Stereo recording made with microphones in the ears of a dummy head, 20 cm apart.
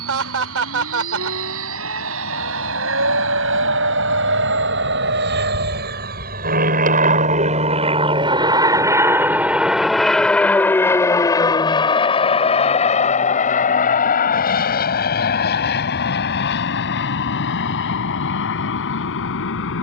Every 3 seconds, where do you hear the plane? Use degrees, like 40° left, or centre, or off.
70° right, 60° right, 30° right, 10° left, 30° left, 50° left, 50° left.